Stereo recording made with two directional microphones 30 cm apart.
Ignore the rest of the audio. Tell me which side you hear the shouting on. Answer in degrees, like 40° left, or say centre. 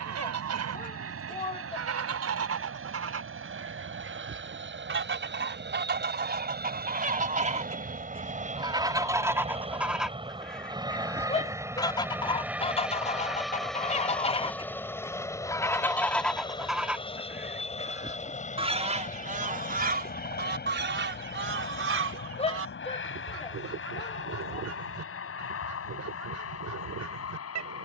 20° left.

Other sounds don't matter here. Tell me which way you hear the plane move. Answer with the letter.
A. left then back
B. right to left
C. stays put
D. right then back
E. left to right
B.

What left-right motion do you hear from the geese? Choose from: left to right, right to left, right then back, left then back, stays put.
left then back.